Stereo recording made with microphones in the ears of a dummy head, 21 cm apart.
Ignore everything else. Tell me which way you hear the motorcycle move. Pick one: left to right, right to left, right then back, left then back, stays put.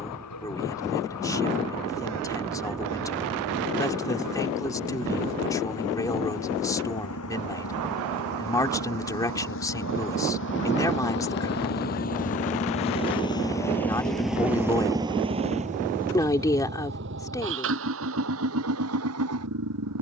left to right.